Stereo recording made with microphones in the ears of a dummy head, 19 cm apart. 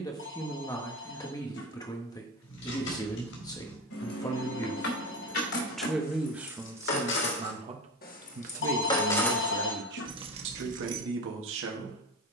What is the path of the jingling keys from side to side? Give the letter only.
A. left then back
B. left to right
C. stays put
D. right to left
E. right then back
B.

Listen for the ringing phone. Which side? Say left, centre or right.
left.